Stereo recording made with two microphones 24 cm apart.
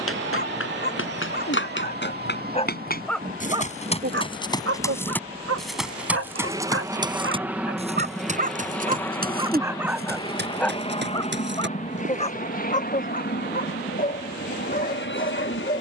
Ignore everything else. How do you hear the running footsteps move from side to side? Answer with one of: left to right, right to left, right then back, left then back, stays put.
left to right.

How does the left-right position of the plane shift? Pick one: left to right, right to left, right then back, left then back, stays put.
right to left.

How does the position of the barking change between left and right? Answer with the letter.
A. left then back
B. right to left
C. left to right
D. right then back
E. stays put
D.